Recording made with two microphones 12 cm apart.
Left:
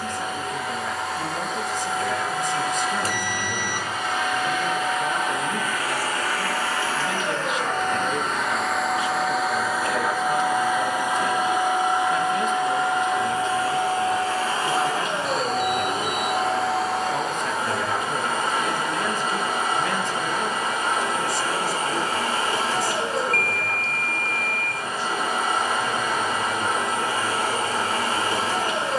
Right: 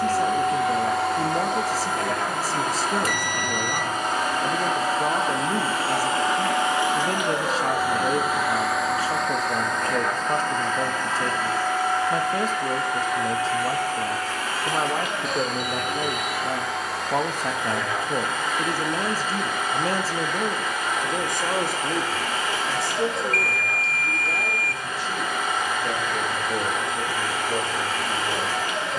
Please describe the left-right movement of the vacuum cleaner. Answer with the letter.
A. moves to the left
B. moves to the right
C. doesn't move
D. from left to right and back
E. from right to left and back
A.